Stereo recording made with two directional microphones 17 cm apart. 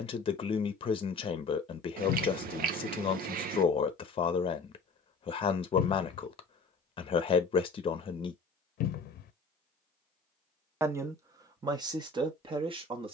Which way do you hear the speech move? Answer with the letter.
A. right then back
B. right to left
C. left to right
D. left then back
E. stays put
C.